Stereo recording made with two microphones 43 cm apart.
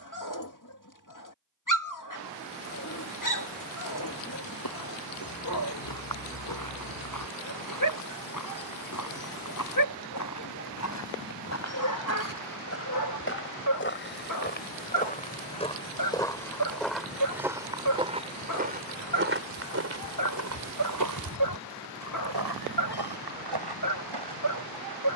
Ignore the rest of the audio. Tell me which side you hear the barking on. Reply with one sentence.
You can hear the barking on the left.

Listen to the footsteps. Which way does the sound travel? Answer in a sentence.
In this clip you hear the footsteps move to the right.